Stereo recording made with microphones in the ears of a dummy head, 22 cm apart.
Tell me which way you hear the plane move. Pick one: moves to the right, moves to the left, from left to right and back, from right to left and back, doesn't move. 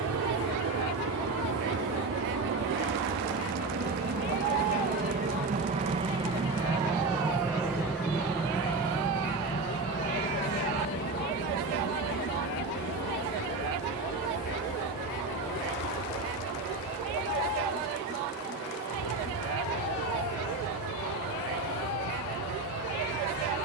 moves to the left.